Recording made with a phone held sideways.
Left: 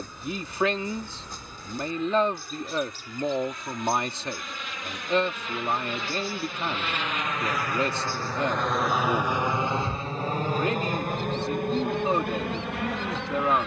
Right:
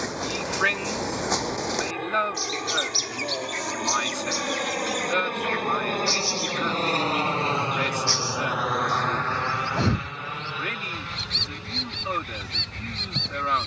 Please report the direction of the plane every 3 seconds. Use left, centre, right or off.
right, right, right, left, left.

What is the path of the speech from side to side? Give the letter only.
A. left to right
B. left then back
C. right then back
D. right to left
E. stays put
E.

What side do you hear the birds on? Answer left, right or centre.
right.